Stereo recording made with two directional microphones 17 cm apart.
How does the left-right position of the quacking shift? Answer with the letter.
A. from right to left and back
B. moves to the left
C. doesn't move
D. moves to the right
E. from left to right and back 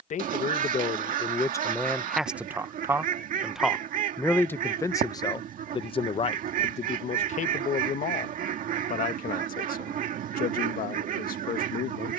C.